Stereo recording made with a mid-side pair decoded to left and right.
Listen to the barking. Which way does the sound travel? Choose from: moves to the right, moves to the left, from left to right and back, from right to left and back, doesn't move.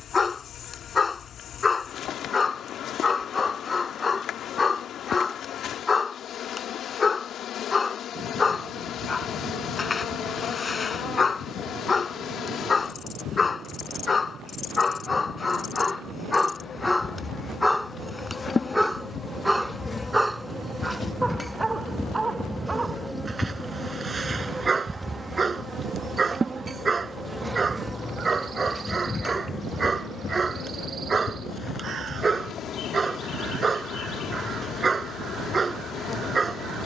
moves to the right.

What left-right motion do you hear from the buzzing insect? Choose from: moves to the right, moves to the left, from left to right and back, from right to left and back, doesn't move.
from left to right and back.